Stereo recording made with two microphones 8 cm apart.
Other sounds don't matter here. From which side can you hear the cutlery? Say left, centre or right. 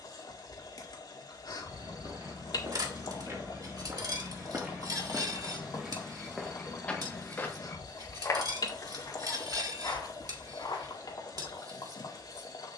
right.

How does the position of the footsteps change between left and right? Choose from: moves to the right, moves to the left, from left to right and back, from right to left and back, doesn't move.
moves to the left.